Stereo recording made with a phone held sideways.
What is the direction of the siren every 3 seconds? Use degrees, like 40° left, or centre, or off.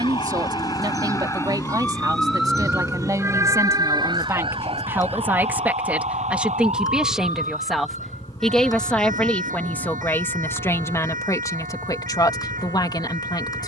20° left, 40° right, 70° right, 80° right, 80° right.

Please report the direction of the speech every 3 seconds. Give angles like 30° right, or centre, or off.
30° right, 20° right, centre, 20° left, 30° left.